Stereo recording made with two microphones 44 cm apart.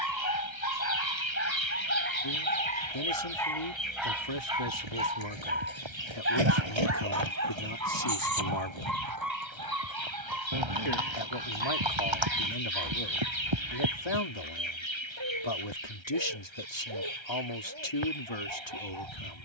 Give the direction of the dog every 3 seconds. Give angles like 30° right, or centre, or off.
30° left, 10° right, 40° right, 50° right, 60° right, 70° right, 70° right.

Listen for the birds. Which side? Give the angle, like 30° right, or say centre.
90° left.